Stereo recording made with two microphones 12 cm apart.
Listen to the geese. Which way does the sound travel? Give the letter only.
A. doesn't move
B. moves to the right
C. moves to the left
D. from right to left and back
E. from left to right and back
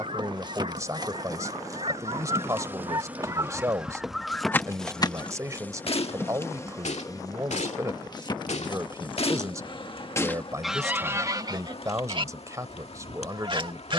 D.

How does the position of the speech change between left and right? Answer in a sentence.
In this clip you hear the speech stay put.